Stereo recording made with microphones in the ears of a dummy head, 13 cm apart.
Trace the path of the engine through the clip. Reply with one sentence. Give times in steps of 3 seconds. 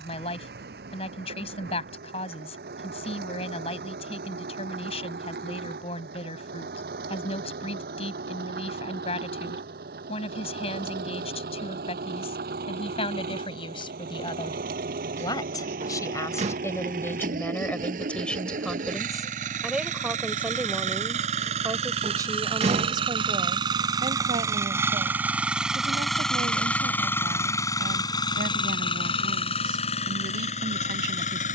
In this clip you hear the engine on the right from 0 s, in the centre from 24 s and on the left from 27 s.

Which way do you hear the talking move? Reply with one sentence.
You can hear the talking move from left to right.